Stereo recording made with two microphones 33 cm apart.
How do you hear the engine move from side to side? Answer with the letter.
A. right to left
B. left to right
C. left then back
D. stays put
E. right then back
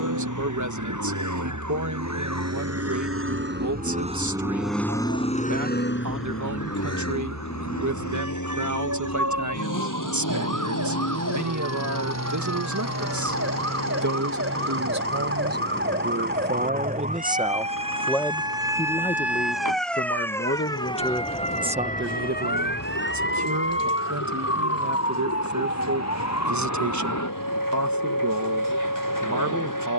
A.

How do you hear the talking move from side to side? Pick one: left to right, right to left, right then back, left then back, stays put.
left then back.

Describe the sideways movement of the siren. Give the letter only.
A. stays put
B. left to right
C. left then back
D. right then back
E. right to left
E.